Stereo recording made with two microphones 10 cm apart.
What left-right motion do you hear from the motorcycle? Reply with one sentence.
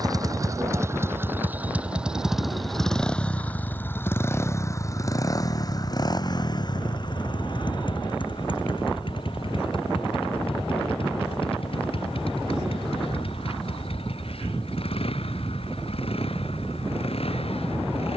In this clip you hear the motorcycle move from right to left.